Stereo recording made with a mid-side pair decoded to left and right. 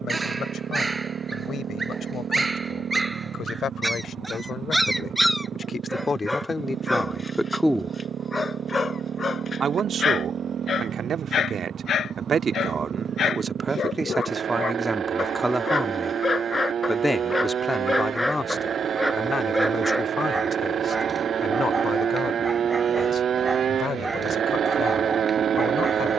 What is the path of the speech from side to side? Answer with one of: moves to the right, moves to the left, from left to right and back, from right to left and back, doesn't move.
from left to right and back.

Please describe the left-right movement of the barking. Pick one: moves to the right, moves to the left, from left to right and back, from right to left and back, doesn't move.
from right to left and back.